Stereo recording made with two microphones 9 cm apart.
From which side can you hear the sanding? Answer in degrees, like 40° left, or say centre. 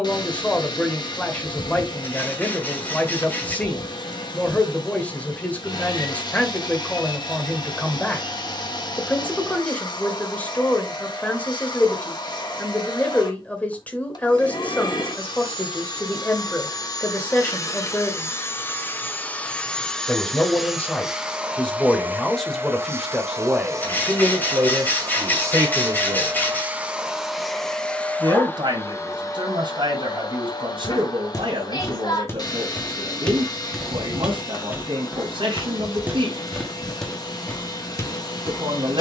20° left.